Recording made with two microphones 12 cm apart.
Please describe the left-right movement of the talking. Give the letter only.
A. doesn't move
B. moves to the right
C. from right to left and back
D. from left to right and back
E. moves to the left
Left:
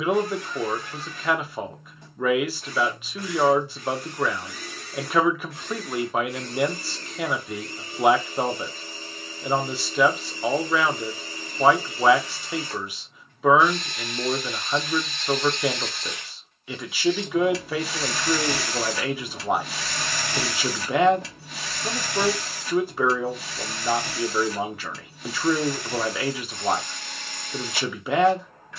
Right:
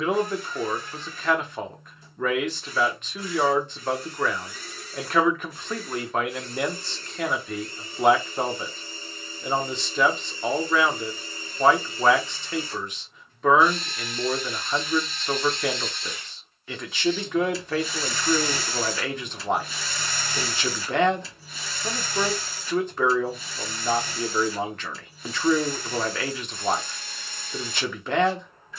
A.